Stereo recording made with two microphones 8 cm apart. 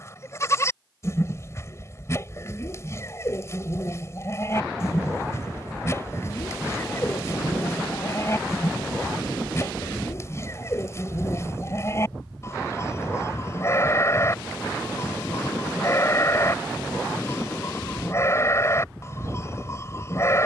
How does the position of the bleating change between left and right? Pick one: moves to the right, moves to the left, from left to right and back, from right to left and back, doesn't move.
doesn't move.